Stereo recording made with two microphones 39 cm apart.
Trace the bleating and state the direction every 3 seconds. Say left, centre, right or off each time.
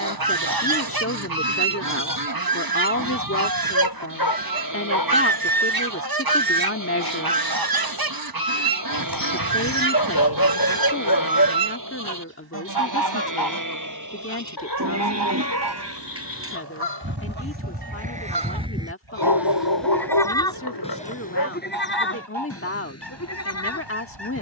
right, right, right, right, right, right, centre, left.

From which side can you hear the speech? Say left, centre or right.
left.